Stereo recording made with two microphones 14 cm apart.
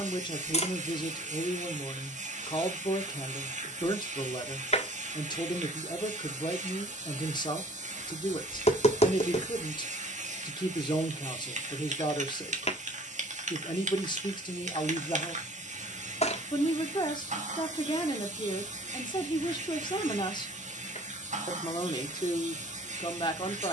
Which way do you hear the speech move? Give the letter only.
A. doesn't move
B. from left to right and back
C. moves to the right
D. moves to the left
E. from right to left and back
A.